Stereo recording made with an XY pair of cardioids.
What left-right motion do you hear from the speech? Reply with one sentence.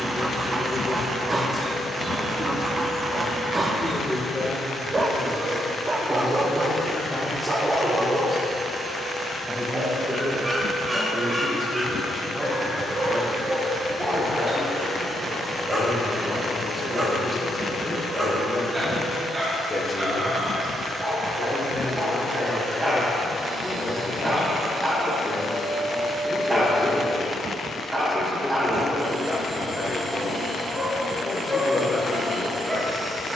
In this clip you hear the speech go right and come back.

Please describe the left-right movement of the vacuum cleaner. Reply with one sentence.
In this clip you hear the vacuum cleaner stay put.